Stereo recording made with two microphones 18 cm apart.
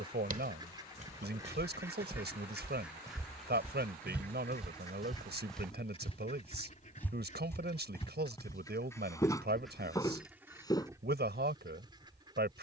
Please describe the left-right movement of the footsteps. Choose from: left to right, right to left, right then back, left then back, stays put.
right to left.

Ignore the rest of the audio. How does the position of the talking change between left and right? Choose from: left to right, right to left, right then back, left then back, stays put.
stays put.